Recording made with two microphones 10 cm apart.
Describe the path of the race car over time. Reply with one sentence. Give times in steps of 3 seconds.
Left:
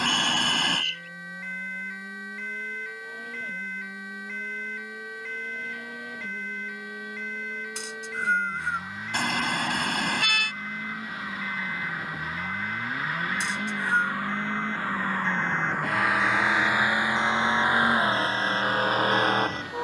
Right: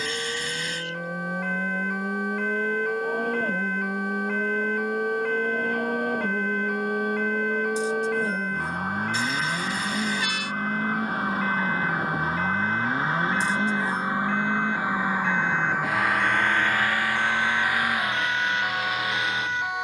In this clip you hear the race car on the right from 0 s, in the centre from 15 s and on the left from 18 s.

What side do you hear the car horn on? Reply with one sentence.
In this clip you hear the car horn on the left.